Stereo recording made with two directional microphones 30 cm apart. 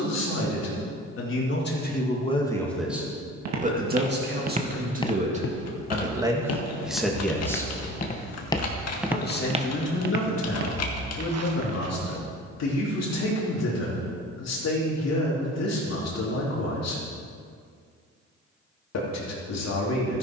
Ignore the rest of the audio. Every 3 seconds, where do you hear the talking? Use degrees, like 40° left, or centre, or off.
30° left, 30° right, centre, 50° left, 60° left, 60° left, 60° left.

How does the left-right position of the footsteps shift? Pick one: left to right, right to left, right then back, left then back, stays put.
left then back.